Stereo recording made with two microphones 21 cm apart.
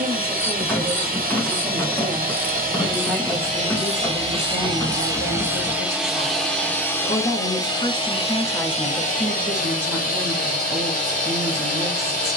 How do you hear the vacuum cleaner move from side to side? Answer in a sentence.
You can hear the vacuum cleaner travel towards the left.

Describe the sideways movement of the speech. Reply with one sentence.
You can hear the speech go left and come back.